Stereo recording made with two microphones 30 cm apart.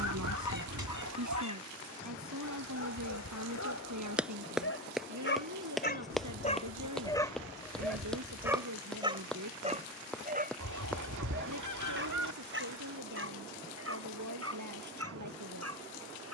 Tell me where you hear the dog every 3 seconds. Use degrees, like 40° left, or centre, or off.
70° left, 50° left, 10° left, 30° right, 50° right, 50° right.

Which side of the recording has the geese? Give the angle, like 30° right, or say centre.
70° right.